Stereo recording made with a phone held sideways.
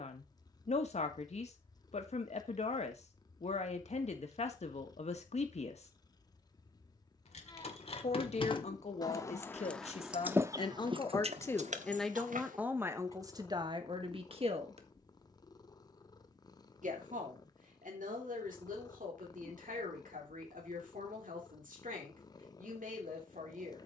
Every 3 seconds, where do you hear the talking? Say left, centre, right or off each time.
left, left, left, left, right, right, right, right.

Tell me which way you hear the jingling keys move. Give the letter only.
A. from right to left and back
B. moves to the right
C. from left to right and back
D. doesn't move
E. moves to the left
B.